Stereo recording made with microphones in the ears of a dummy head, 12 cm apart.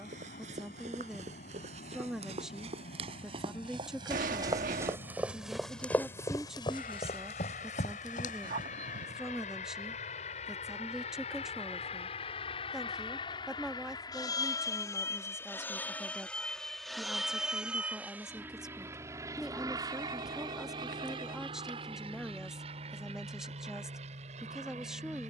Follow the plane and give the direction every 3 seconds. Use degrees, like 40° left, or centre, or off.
80° left, 70° left, 70° left, 60° left, 40° left, 10° left, 20° right, 40° right, 50° right.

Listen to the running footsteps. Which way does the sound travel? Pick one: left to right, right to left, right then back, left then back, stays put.
right to left.